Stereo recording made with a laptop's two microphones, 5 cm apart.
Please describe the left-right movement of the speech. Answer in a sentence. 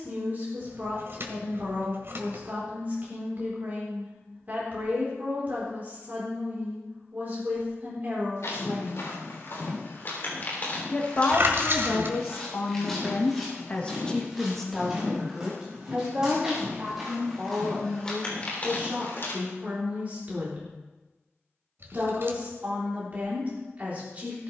You can hear the speech go left and come back.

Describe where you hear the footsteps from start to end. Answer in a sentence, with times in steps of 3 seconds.
You can hear the footsteps not at all from 0 s, on the left from 6 s, in the centre from 12 s, on the left from 18 s and not at all from 21 s.